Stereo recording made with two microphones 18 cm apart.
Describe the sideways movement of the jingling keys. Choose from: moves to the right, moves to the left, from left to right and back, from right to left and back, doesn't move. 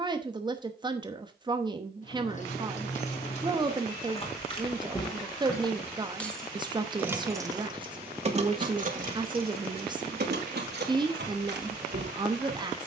moves to the right.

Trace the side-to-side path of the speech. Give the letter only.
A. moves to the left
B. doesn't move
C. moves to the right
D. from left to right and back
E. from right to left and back
B.